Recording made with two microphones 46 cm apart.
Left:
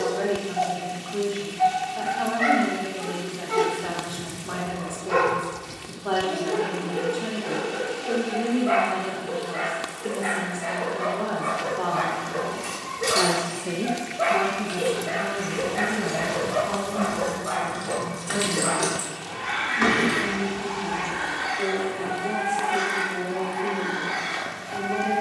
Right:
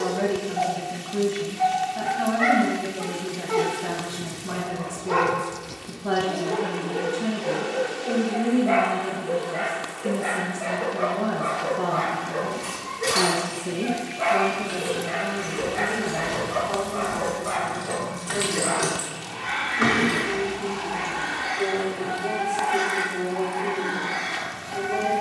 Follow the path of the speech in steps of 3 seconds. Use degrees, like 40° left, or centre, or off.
40° right, 40° right, 40° right, 40° right, 10° right, 40° left, 60° left, 70° left, 70° left.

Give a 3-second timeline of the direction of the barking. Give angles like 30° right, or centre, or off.
50° left, 50° left, 30° left, 20° left, 10° right, 40° right, 50° right, 70° right, 70° right.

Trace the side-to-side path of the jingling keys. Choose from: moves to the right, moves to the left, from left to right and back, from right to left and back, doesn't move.
moves to the left.